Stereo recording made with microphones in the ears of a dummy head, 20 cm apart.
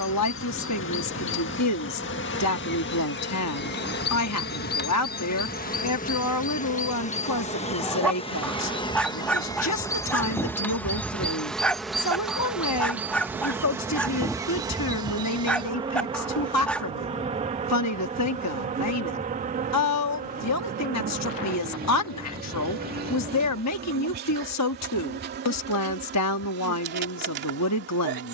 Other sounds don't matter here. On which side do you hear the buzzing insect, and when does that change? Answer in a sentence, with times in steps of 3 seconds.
In this clip you hear the buzzing insect on the left from 0 s, in the centre from 9 s and on the right from 15 s.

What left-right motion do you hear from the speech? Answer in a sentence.
You can hear the speech stay in one place.